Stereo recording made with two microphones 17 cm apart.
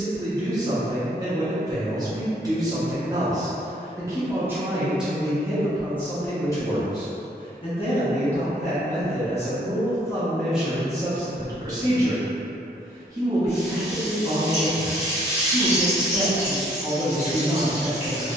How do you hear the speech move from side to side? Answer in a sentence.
You can hear the speech go left and come back.